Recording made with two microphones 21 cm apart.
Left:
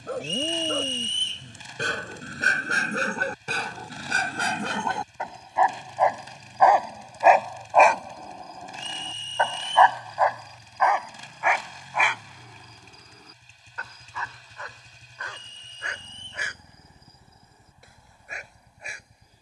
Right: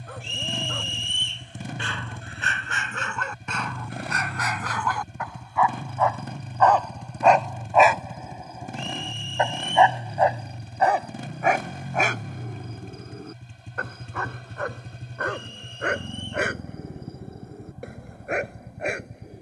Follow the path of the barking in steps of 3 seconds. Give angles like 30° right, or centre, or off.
50° left, 30° left, centre, 30° right, 60° right, 70° right, 80° right.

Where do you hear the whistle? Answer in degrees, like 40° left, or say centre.
40° left.